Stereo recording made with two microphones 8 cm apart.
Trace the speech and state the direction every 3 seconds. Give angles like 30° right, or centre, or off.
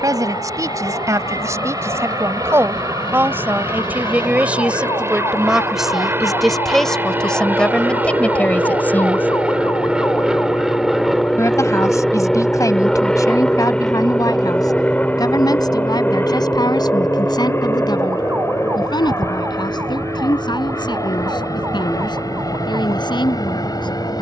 40° right, 20° right, 10° left, 30° left, 50° left, 50° left, 60° left, 60° left.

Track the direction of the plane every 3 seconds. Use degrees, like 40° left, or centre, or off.
50° right, 40° right, 20° right, 10° right, 10° left, 20° left, 30° left, 40° left.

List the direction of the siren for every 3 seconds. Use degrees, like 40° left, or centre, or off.
80° left, 70° left, 60° left, 30° left, centre, 30° right, 40° right, 50° right.